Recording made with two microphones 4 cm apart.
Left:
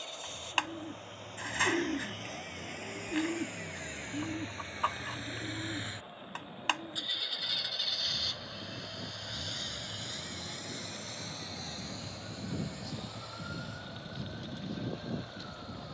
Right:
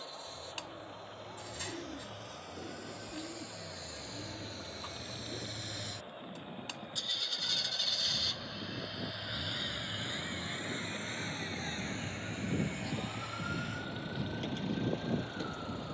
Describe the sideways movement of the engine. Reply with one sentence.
In this clip you hear the engine move to the right.